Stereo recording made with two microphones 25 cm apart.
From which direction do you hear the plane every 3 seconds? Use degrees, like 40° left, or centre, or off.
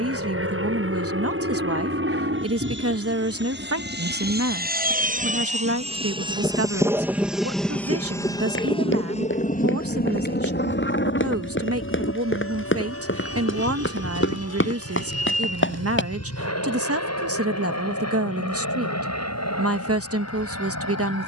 60° right, 40° right, centre, 40° left, 60° left, 70° left, 70° left.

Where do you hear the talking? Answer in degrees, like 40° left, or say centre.
70° right.